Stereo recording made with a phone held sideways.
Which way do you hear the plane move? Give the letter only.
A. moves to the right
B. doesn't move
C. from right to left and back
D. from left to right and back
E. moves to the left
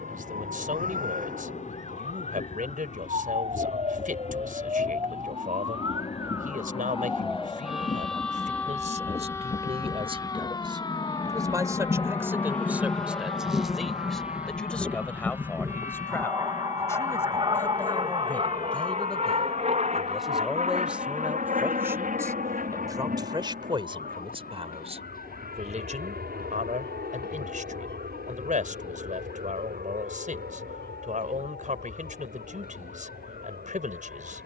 A.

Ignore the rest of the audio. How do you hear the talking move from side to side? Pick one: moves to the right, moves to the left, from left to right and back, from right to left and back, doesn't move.
from right to left and back.